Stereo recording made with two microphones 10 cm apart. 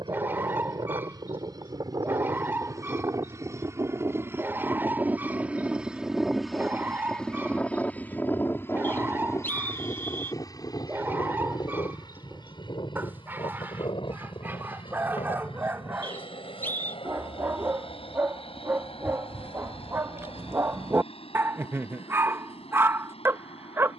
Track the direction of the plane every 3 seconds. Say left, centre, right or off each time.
right, right, centre, left, left, left, left, left.